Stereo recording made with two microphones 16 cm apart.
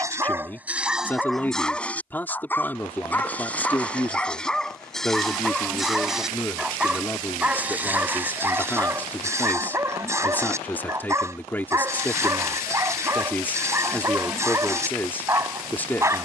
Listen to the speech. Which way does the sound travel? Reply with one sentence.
In this clip you hear the speech stay put.